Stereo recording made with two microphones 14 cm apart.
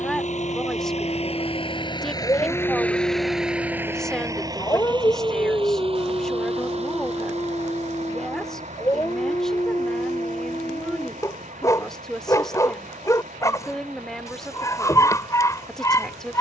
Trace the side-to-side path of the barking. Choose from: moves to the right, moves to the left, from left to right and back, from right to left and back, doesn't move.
doesn't move.